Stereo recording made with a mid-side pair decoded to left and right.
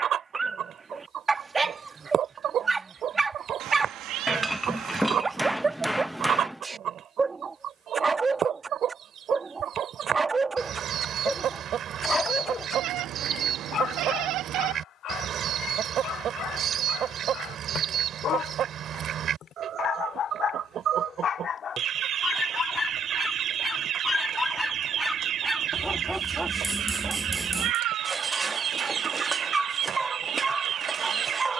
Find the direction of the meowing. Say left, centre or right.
right.